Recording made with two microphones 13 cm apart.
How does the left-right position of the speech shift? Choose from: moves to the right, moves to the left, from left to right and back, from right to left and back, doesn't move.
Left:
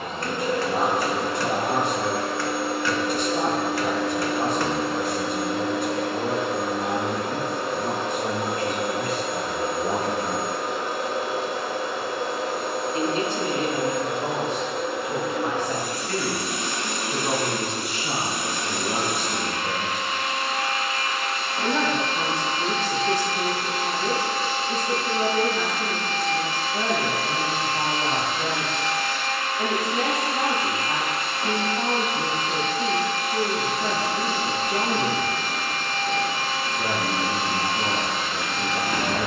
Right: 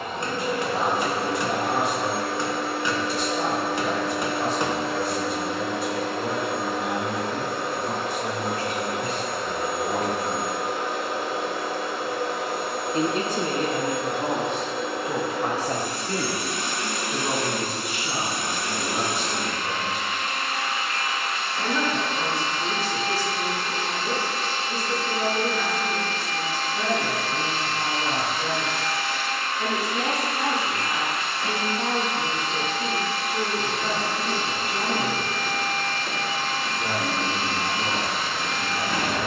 from left to right and back.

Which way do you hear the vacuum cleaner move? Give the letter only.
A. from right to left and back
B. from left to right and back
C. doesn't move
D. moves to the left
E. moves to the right
C.